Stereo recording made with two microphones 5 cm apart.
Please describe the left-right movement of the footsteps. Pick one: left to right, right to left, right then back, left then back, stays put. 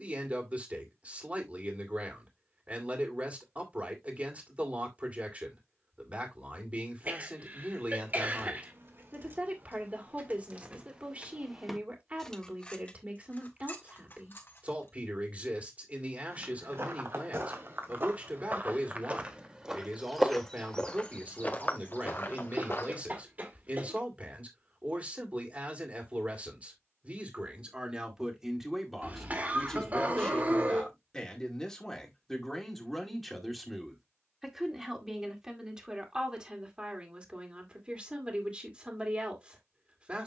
right to left.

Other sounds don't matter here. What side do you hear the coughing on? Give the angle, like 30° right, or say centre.
30° right.